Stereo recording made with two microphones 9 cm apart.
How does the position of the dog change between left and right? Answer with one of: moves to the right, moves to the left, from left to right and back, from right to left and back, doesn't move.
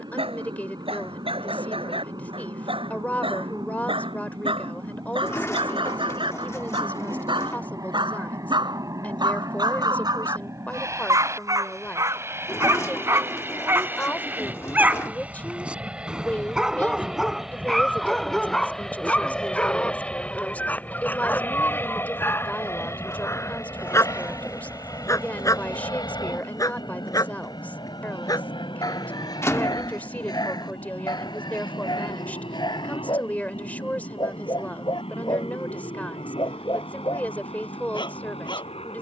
moves to the left.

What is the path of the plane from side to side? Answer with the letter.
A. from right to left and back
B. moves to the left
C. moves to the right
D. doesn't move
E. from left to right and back
B.